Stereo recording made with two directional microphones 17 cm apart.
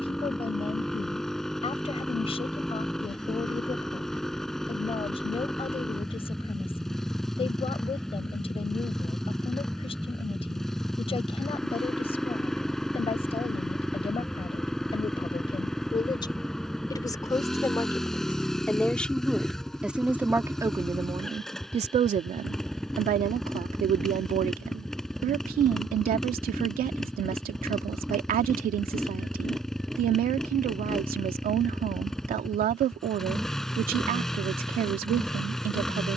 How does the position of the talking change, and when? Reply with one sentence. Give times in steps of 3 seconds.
In this clip you hear the talking on the left from 0 s, in the centre from 18 s and on the right from 21 s.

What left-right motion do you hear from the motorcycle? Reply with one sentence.
You can hear the motorcycle stay in one place.